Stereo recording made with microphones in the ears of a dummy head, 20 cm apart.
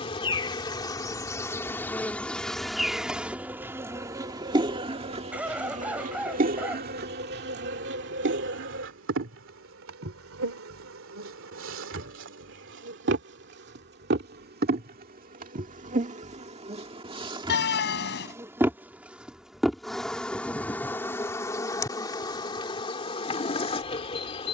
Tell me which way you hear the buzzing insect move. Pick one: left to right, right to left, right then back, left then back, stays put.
right then back.